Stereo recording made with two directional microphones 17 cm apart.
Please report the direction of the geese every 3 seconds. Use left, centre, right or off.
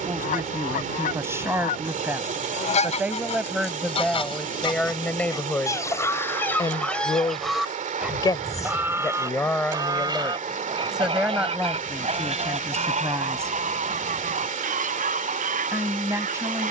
left, left, centre, right, right, right.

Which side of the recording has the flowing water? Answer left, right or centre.
right.